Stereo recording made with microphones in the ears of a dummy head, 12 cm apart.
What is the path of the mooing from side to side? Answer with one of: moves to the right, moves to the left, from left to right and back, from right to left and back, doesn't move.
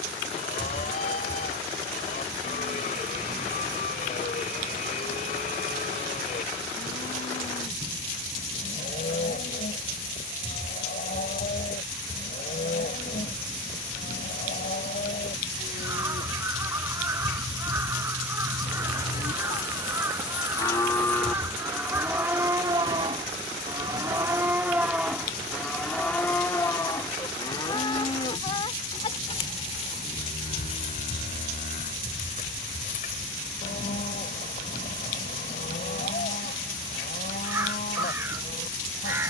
from left to right and back.